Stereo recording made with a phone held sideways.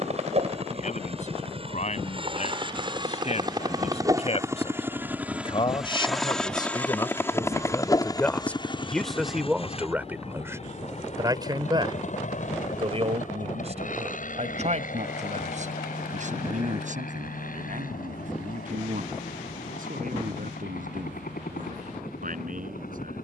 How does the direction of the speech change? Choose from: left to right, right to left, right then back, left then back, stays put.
left to right.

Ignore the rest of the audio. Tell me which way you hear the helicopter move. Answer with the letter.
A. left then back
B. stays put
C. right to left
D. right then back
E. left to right
C.